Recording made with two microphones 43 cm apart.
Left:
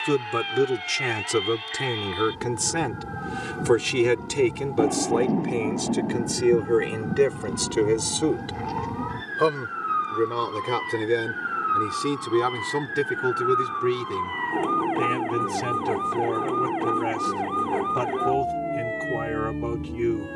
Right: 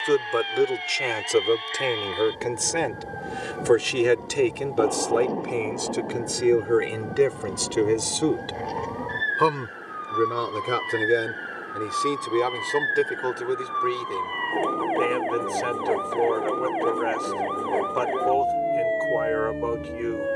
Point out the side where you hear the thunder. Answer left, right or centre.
left.